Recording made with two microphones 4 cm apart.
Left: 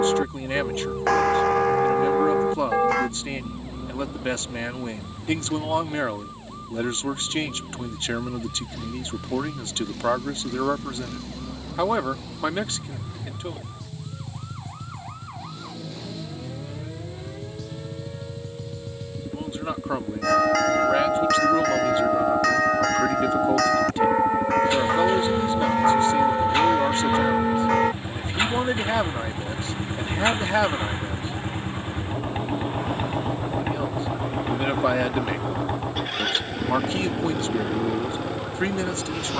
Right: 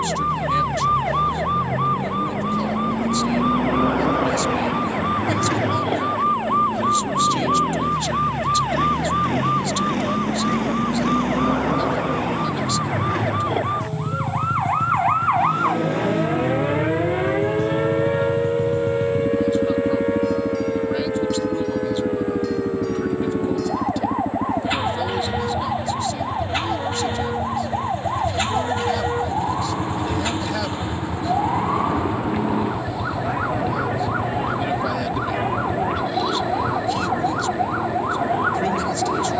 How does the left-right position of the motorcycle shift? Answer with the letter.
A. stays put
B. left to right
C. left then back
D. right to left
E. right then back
D.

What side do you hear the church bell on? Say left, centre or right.
left.